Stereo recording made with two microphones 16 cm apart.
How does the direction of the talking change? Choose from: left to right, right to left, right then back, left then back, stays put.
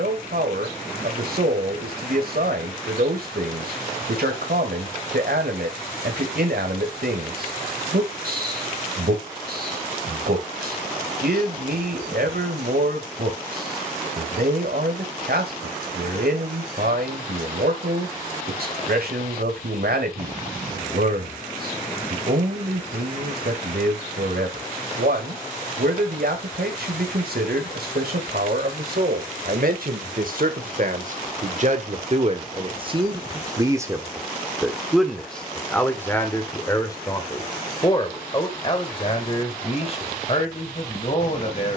right to left.